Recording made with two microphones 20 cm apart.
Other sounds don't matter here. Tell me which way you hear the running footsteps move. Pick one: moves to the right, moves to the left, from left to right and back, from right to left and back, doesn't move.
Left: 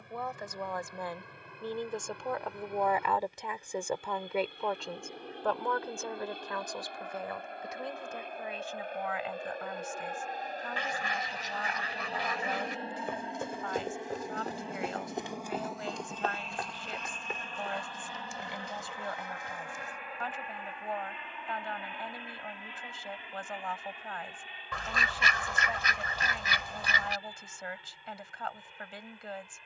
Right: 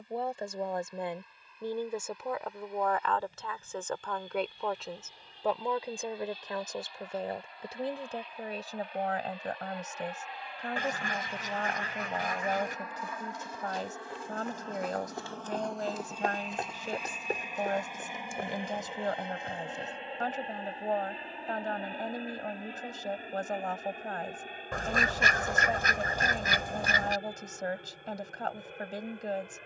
moves to the right.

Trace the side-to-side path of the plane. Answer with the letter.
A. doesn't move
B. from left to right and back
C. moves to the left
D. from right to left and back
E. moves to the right
E.